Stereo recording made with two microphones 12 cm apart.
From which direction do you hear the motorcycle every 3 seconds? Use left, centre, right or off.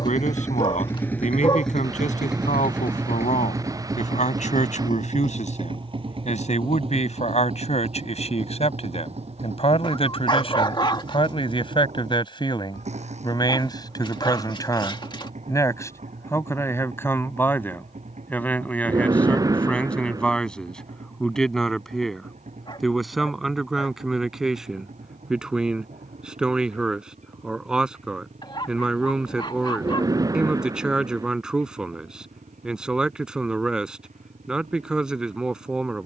centre, right, right, right, right, right, right, right, right, right, right, right.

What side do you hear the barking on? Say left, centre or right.
left.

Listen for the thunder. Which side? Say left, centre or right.
right.